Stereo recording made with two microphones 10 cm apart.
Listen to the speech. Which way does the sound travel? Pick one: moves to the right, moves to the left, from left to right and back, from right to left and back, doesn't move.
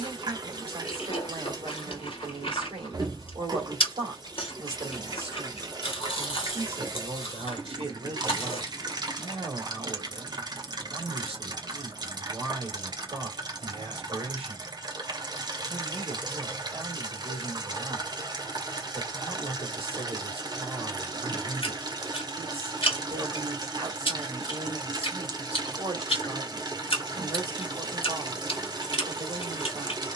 doesn't move.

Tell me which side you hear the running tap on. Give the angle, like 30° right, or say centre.
40° right.